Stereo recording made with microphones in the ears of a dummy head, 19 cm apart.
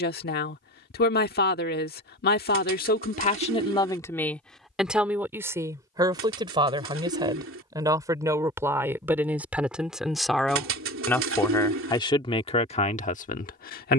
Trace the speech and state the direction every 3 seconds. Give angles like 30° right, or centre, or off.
50° left, 10° left, 20° right, centre, 40° left.